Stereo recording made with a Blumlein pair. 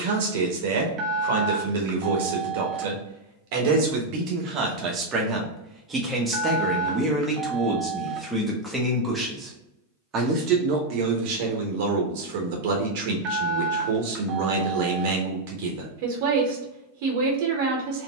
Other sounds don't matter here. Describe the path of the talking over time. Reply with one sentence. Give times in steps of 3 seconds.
You can hear the talking on the right from 0 s, in the centre from 6 s and on the right from 9 s.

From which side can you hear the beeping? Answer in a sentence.
You can hear the beeping on the right.